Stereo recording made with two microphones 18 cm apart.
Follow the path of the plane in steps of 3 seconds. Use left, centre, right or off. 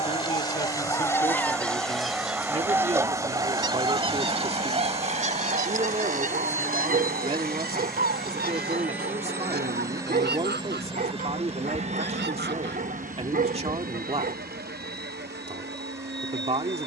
left, left, centre, right, right, right.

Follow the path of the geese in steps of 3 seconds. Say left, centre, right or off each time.
centre, right, right, right, right, right.